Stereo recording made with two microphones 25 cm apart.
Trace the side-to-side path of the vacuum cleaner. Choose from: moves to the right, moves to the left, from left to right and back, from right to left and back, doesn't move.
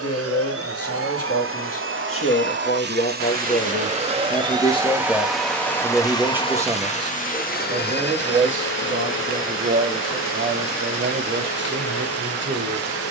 moves to the left.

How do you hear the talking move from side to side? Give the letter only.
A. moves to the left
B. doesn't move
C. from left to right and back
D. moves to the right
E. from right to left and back
D.